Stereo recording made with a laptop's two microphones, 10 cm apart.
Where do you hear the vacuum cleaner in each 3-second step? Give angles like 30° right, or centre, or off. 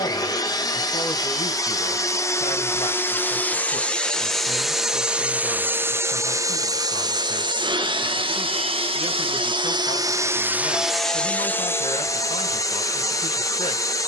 30° left, centre, 40° right, 20° right, 30° left.